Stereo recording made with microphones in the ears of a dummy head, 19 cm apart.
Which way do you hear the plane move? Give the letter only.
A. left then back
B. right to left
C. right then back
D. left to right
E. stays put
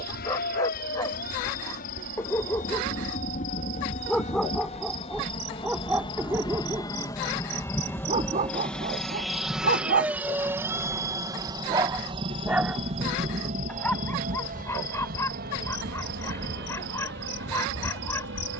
D.